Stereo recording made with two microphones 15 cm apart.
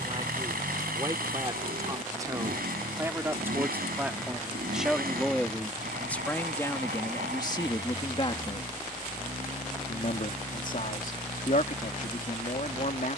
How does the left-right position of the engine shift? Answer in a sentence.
In this clip you hear the engine stay put.